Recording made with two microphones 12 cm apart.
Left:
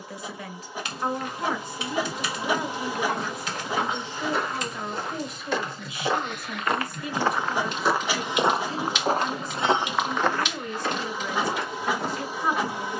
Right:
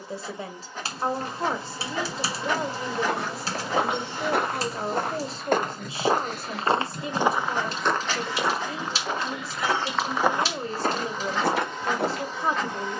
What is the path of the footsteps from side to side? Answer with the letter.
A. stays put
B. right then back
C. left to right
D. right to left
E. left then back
E.